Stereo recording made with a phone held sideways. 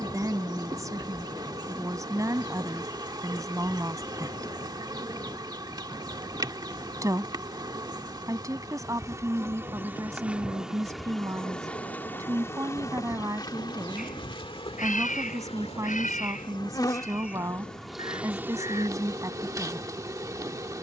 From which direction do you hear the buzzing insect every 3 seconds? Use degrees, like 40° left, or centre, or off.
30° right, 30° right, 30° right, 10° right, 30° left, 30° left, 20° right.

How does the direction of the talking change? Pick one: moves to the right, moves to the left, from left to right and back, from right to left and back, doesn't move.
doesn't move.